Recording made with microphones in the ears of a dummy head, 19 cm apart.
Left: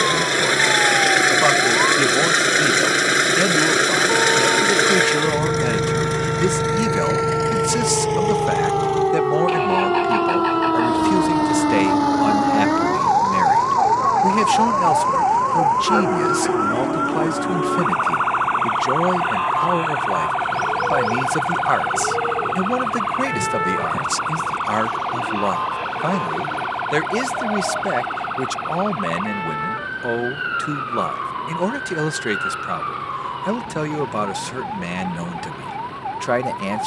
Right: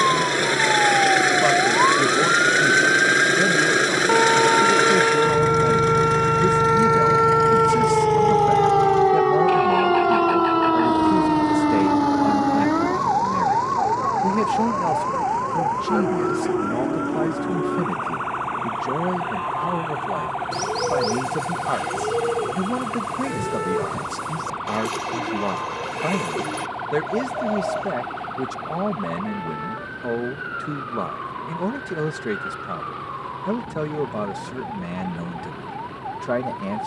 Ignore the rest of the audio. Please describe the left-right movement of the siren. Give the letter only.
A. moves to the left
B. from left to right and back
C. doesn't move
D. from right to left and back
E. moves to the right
A.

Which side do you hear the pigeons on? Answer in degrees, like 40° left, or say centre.
60° right.